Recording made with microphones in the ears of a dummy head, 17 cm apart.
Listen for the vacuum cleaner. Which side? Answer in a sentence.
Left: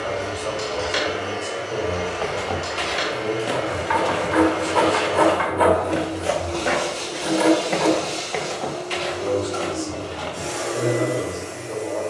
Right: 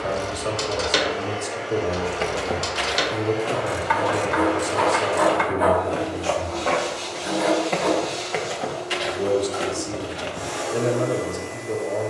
You can hear the vacuum cleaner on the left.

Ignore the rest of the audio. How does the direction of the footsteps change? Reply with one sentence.
You can hear the footsteps move from right to left and back again.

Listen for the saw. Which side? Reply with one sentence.
In this clip you hear the saw on the left.